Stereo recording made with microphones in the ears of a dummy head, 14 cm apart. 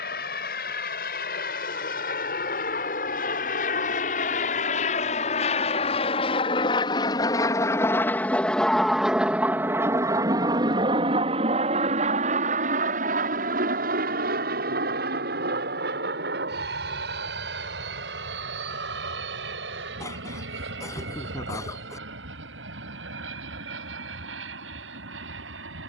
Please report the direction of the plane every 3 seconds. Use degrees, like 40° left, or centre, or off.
60° left, 50° left, 20° left, 20° right, 50° right, 60° right, 70° right, 70° right, 80° right.